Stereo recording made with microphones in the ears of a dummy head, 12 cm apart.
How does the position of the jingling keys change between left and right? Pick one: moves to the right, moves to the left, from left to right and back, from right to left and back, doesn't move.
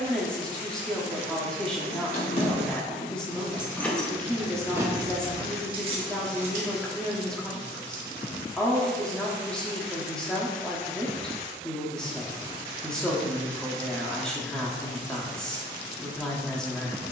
moves to the right.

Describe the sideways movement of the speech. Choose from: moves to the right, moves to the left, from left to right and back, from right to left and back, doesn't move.
doesn't move.